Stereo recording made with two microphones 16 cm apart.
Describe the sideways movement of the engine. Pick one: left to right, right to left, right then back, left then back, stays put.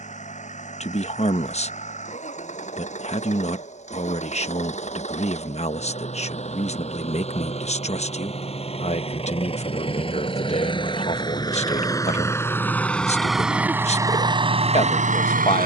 left to right.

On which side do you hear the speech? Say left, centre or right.
left.